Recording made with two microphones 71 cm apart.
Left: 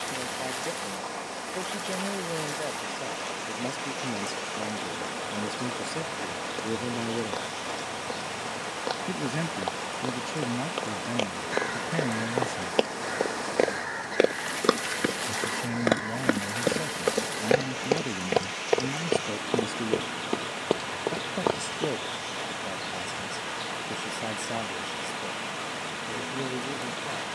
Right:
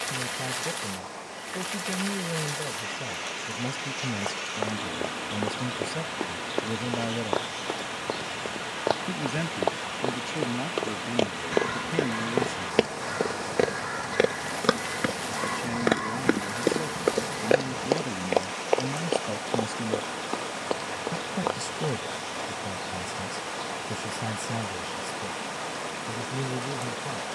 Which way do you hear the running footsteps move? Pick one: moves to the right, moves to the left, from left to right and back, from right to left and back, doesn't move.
moves to the left.